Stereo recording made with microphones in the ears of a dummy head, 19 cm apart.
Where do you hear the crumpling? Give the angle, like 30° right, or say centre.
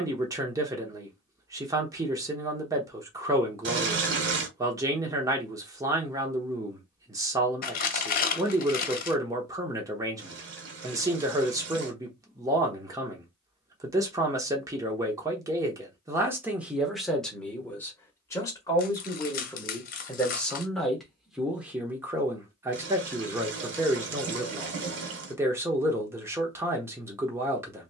40° left.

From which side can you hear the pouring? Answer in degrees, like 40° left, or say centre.
60° right.